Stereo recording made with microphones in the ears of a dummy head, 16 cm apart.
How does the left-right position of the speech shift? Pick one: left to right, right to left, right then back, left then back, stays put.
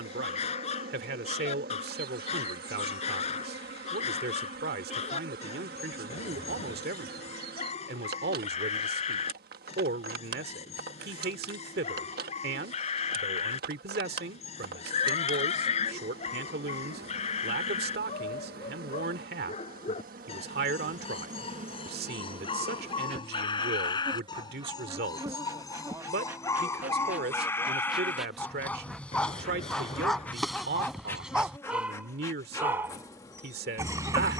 stays put.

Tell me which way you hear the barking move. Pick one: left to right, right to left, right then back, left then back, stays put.
left to right.